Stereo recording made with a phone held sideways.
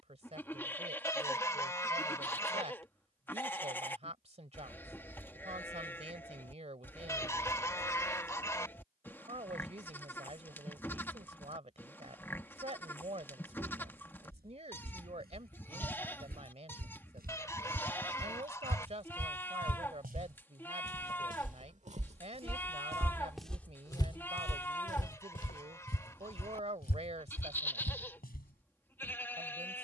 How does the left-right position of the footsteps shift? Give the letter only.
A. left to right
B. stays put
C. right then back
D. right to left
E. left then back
D.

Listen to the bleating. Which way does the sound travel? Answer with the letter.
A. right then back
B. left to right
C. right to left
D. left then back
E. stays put
E.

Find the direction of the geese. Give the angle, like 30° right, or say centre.
20° left.